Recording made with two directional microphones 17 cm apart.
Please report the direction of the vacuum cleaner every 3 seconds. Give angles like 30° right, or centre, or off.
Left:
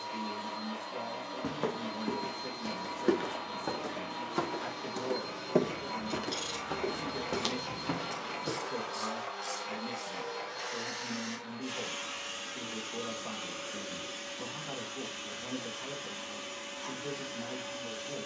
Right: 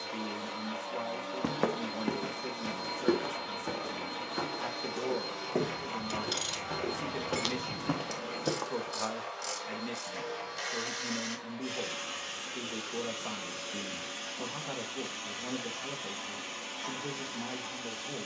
30° right, 20° right, centre, centre, 20° right, 20° right.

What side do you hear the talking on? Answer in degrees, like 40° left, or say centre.
20° right.